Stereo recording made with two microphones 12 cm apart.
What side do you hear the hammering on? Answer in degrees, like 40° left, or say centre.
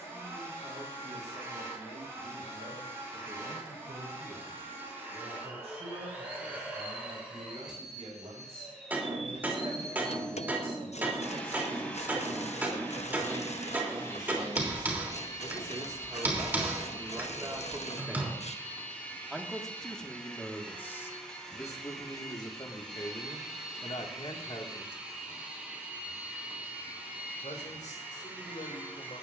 10° right.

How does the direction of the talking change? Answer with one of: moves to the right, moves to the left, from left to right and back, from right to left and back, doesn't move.
moves to the left.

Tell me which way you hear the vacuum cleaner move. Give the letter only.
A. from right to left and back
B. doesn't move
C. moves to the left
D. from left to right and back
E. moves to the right
A.